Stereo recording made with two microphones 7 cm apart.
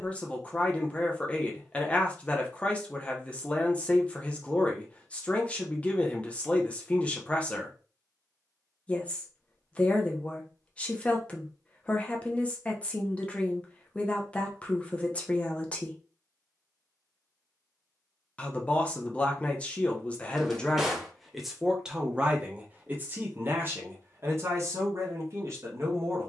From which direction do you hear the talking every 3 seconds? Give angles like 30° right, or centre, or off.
20° left, 20° left, 20° left, 20° left, 20° left, 20° left, 20° left, 20° right, 40° right.